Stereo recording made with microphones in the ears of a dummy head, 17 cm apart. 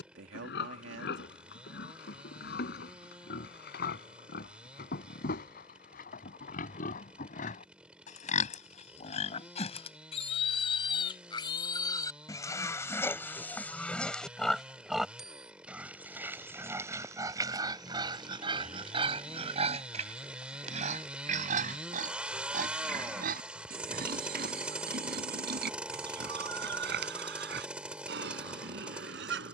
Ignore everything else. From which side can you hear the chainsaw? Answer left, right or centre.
centre.